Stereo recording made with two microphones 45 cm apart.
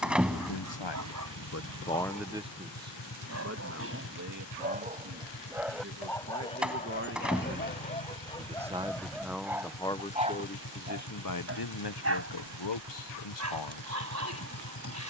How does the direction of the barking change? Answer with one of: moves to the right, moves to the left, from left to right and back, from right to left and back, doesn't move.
from right to left and back.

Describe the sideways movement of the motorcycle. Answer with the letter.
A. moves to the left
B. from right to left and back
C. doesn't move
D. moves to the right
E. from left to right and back
C.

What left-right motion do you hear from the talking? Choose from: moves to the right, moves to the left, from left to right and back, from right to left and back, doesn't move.
from left to right and back.